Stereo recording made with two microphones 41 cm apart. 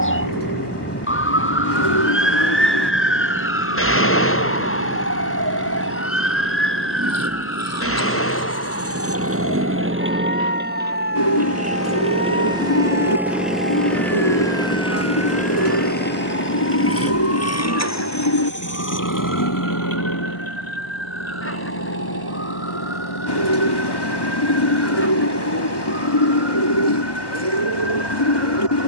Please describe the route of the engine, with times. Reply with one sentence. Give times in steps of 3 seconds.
In this clip you hear the engine on the right from 0 s, in the centre from 12 s and on the left from 15 s.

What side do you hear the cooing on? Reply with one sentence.
In this clip you hear the cooing on the left.